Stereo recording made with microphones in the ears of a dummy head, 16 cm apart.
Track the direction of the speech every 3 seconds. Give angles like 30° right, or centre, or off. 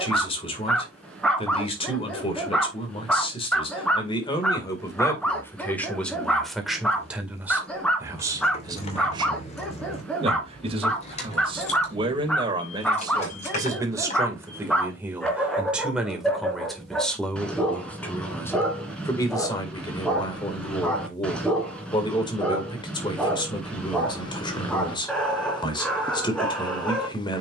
30° left, 20° left, 10° right, 30° right, 20° right, centre, 20° left, 30° left, 30° left.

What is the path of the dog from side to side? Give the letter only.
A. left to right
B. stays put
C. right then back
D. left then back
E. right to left
B.